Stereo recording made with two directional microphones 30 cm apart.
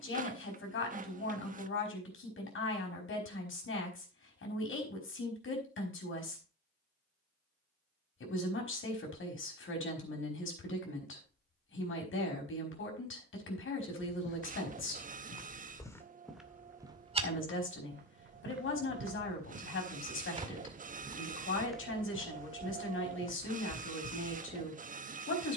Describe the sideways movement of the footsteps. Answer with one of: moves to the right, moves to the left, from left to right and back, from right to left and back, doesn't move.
from left to right and back.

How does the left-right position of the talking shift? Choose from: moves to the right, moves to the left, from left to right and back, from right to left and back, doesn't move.
doesn't move.